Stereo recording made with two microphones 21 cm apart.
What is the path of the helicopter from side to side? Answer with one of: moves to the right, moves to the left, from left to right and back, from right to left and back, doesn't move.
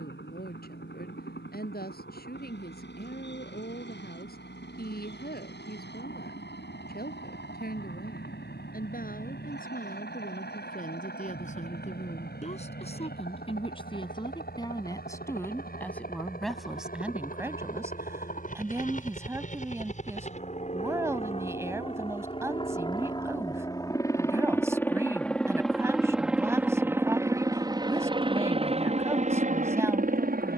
moves to the right.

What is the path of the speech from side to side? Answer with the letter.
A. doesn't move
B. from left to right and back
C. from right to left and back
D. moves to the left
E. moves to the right
E.